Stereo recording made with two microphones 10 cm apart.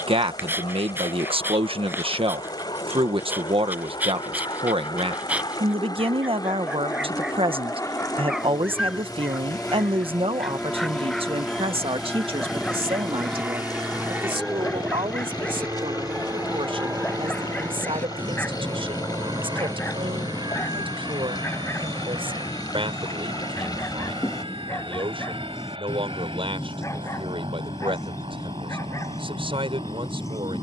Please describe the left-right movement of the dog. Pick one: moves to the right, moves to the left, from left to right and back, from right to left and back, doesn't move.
moves to the left.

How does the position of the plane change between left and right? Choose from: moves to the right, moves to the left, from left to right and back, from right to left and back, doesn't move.
moves to the right.